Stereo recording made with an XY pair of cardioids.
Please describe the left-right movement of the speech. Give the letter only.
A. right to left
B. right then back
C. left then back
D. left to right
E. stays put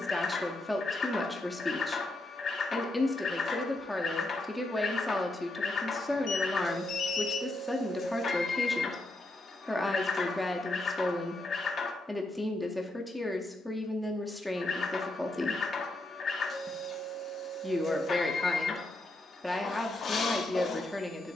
E.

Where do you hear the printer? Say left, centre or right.
left.